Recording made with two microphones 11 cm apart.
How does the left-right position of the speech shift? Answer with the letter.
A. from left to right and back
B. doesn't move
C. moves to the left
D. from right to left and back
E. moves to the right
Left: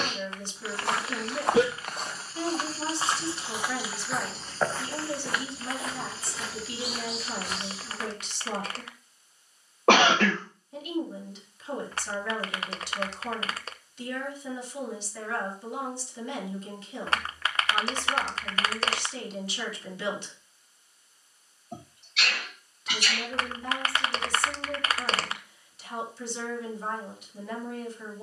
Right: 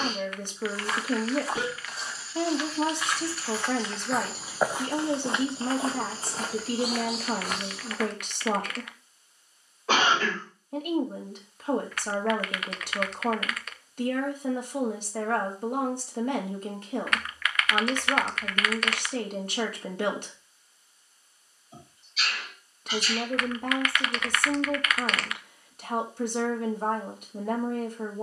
B.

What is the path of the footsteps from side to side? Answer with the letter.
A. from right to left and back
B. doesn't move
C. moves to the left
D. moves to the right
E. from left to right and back
D.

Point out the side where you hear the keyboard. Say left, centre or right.
left.